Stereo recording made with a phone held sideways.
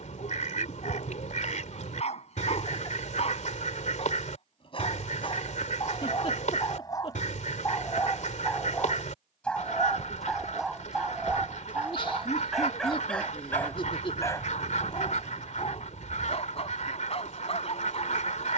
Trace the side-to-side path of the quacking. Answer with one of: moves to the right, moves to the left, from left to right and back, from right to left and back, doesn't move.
doesn't move.